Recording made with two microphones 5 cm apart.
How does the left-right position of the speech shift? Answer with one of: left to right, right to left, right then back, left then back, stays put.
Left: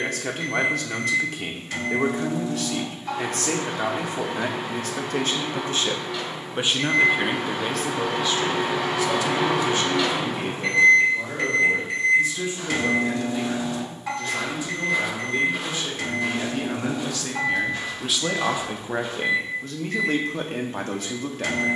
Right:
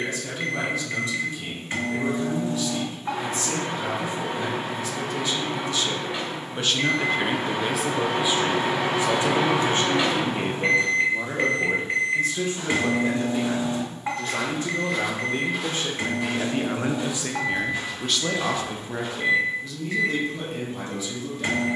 right then back.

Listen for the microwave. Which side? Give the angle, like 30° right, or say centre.
30° right.